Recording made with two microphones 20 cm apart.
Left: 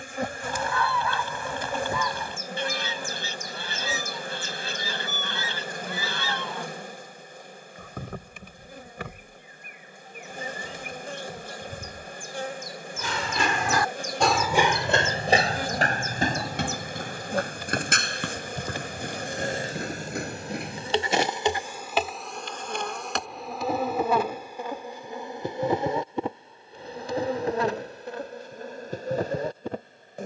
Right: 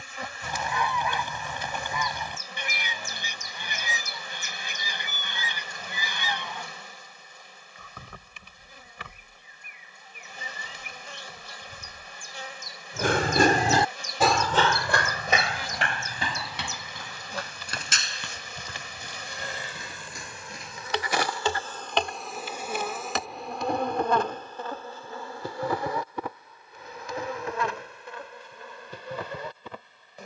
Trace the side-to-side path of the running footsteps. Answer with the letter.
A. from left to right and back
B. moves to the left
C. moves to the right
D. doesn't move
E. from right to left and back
B.